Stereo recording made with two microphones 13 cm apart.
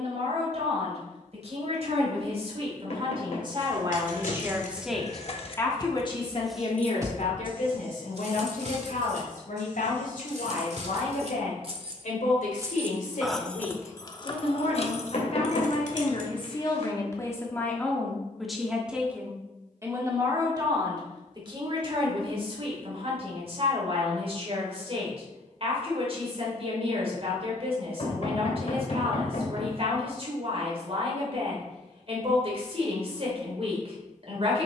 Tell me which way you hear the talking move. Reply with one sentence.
In this clip you hear the talking move from right to left and back again.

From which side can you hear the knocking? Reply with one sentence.
You can hear the knocking on the left.